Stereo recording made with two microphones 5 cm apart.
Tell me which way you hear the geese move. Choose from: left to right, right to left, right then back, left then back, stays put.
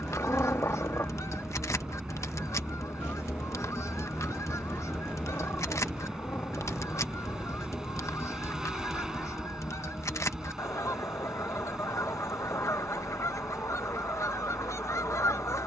stays put.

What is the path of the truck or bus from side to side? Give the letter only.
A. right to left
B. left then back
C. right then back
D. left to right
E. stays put
E.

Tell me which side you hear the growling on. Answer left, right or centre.
left.